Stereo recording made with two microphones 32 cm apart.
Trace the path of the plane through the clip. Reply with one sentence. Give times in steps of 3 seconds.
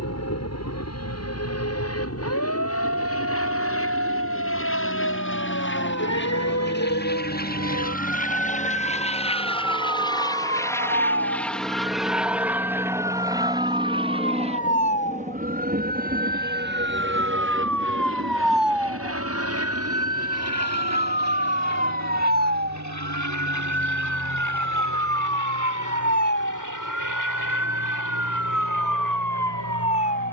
In this clip you hear the plane on the left from 0 s, in the centre from 9 s and on the right from 15 s.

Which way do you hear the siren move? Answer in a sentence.
You can hear the siren go from the left side to the right.